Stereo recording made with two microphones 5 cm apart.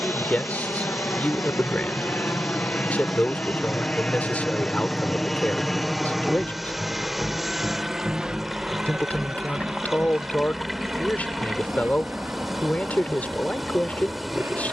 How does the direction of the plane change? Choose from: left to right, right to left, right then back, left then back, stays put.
left to right.